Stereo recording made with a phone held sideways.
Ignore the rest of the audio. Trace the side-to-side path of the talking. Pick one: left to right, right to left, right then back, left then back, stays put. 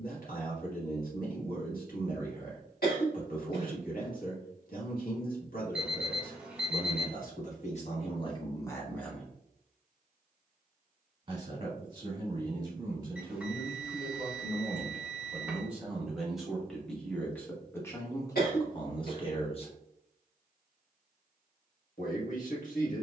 right then back.